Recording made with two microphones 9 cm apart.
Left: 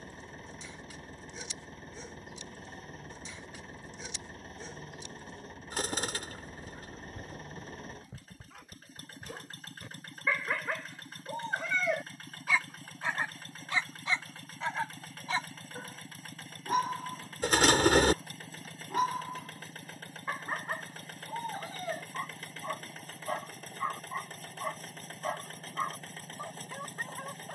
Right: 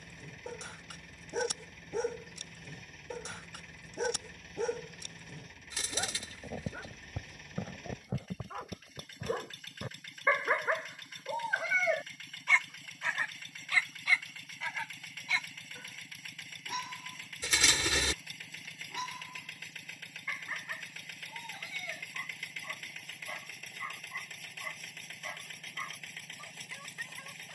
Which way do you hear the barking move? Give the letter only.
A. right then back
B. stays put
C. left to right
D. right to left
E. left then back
D.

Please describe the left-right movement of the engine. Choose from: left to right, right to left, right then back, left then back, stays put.
stays put.